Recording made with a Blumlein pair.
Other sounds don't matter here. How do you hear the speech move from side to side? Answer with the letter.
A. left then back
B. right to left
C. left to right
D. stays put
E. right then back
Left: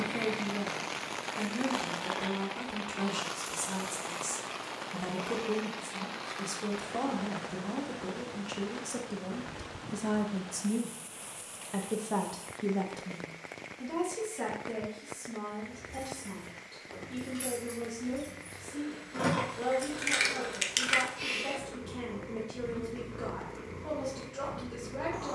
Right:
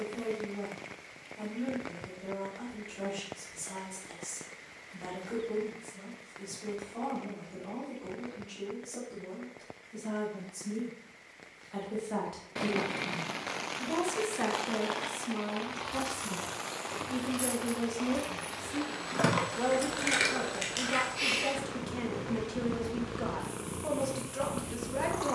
C.